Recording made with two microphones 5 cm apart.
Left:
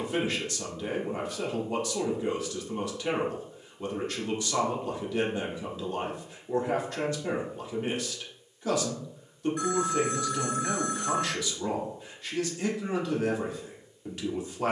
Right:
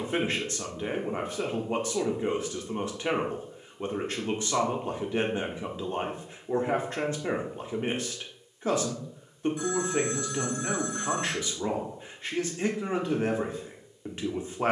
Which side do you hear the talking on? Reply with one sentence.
In this clip you hear the talking on the right.